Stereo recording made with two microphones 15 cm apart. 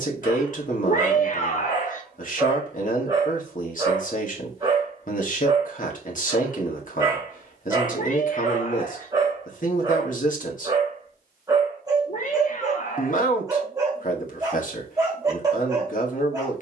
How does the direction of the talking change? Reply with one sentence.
In this clip you hear the talking stay put.